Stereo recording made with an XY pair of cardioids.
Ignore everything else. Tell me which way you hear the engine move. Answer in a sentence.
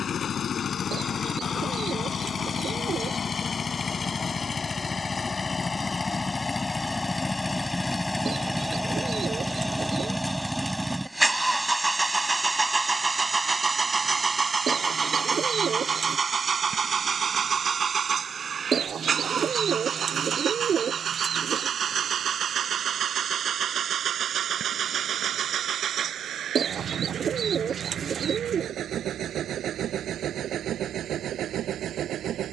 You can hear the engine move to the right.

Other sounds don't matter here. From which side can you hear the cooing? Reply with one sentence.
You can hear the cooing on the right.